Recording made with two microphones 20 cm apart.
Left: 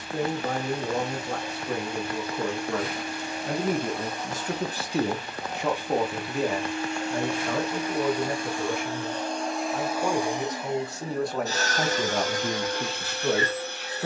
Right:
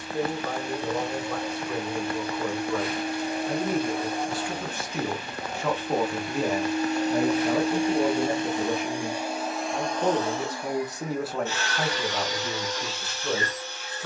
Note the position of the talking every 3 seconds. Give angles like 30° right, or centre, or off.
70° left, 40° left, 20° right, 20° right, 70° left.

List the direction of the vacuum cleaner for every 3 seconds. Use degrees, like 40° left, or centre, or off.
60° right, 50° right, 30° right, 20° left, 60° left.